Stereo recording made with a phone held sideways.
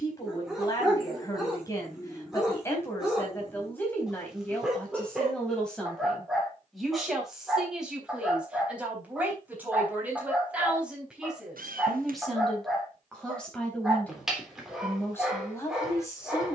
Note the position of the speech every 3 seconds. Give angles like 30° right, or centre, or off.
20° left, 10° left, centre, 10° right, 10° left, 20° left.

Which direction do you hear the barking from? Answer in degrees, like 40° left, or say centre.
centre.